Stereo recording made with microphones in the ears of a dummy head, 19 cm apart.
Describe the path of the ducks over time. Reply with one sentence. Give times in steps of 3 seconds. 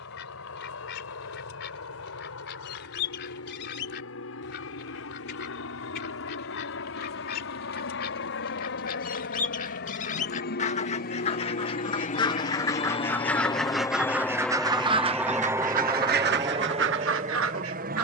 In this clip you hear the ducks on the left from 0 s, in the centre from 12 s and on the right from 15 s.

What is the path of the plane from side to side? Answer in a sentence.
You can hear the plane go from the left side to the right.